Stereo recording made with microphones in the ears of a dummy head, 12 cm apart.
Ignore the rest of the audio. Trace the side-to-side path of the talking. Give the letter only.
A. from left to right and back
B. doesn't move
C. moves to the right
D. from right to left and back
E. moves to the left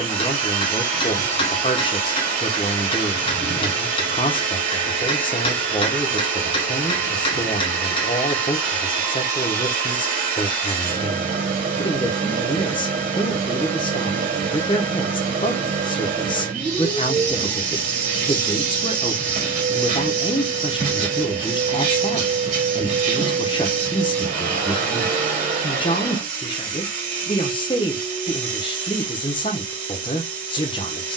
B.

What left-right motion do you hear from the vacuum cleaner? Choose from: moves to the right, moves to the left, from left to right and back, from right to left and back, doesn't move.
doesn't move.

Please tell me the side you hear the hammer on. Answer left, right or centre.
left.